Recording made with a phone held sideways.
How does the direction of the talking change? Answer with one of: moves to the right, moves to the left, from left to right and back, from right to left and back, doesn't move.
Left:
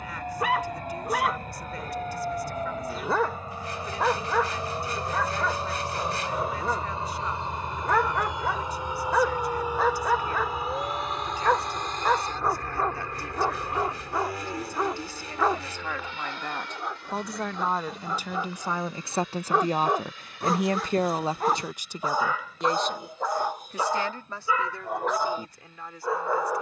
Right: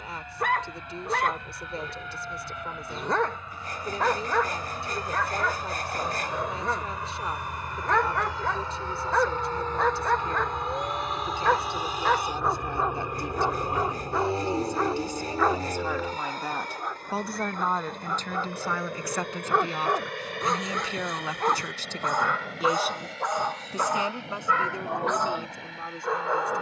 from right to left and back.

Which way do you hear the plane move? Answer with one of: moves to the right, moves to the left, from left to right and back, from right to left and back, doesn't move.
moves to the right.